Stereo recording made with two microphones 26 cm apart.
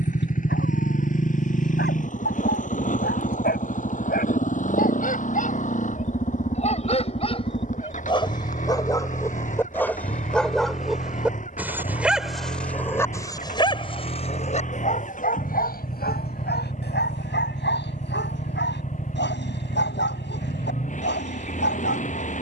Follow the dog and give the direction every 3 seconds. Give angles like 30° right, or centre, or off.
40° left, 30° left, 20° left, centre, 10° left, 40° left, 40° left, 40° left.